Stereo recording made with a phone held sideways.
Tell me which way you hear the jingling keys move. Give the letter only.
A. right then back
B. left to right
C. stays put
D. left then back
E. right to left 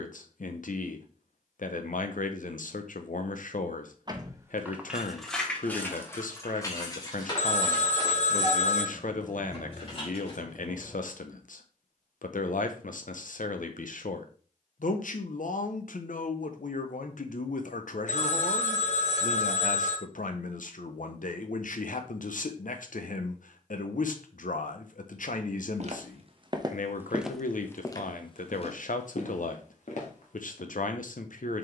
E.